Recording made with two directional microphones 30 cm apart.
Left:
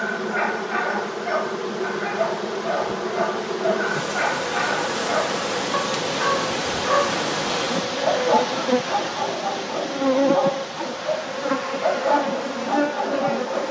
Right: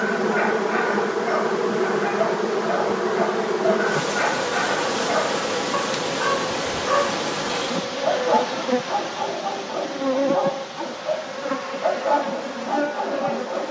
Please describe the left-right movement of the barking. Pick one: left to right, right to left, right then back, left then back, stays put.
stays put.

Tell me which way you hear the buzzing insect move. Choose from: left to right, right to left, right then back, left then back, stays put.
right to left.